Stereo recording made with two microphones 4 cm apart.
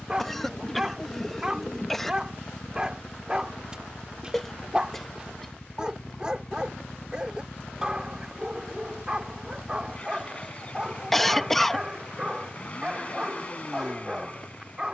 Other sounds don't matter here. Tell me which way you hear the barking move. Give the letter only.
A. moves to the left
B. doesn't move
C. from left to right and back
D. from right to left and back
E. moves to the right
B.